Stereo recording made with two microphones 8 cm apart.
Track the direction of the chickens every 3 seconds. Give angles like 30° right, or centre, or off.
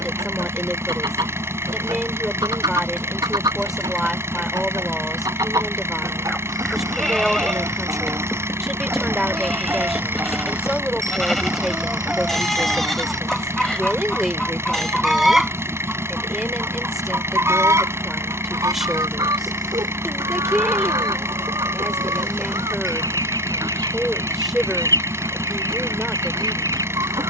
60° right, 60° right, 40° right, 20° right, centre, 20° right, 50° right, 50° right, 50° right.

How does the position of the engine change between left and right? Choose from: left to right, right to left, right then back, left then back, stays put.
stays put.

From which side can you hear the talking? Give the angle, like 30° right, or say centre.
centre.